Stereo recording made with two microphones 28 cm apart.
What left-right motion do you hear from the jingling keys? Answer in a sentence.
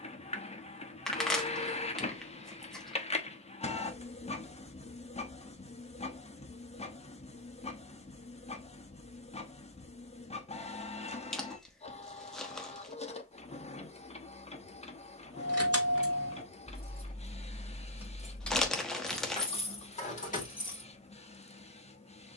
You can hear the jingling keys travel towards the left.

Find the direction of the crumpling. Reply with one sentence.
You can hear the crumpling in the centre.